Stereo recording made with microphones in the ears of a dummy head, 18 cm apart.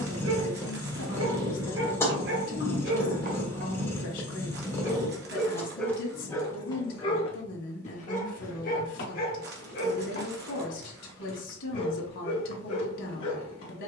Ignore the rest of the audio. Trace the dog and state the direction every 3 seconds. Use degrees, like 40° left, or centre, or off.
60° right, 20° right, 30° left, 50° left, 50° left.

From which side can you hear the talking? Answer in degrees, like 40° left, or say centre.
70° left.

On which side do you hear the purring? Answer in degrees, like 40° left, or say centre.
10° left.